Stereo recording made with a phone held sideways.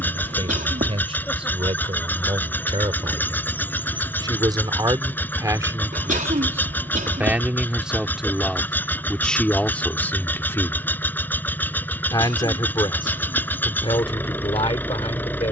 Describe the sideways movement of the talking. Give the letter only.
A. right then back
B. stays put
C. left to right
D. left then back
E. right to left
E.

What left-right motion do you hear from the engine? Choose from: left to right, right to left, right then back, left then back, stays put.
stays put.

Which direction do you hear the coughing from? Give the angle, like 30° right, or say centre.
80° right.